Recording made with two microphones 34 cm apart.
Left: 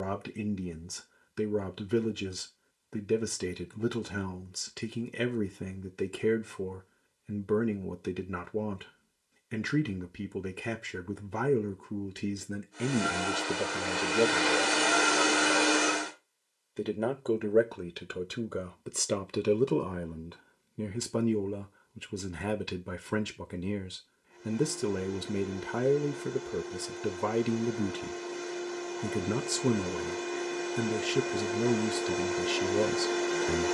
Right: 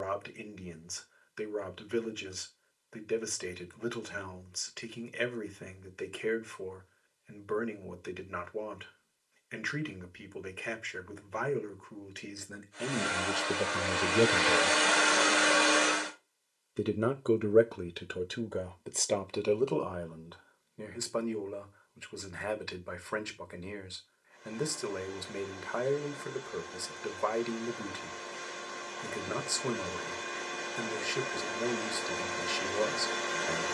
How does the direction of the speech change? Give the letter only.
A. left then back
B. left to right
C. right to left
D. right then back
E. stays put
D.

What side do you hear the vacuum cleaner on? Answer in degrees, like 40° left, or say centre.
50° left.